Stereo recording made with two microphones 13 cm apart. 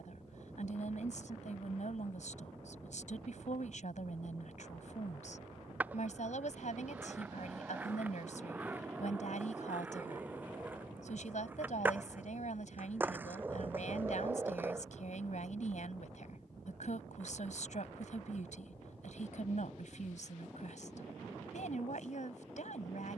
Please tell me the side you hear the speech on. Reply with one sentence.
In this clip you hear the speech on the left.